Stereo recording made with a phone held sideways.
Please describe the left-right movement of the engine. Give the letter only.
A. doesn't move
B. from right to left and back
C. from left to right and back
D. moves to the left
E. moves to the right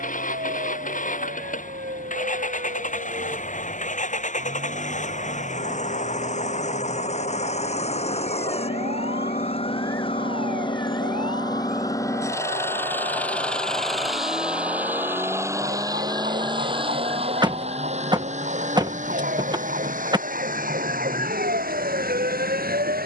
E.